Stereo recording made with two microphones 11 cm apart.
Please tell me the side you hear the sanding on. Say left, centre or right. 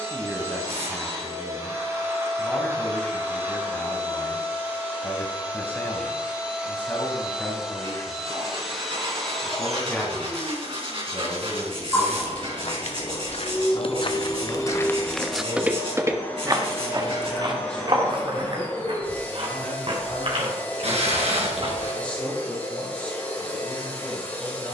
right.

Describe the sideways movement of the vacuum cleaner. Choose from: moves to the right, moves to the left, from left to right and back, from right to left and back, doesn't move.
moves to the left.